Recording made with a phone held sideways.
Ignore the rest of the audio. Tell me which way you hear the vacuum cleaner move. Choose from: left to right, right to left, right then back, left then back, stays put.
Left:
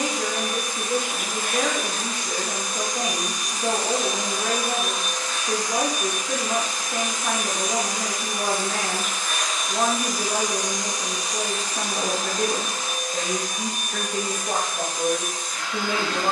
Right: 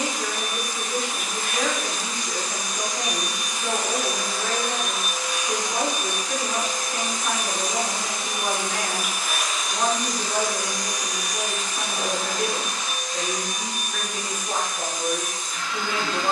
right then back.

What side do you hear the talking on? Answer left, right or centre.
left.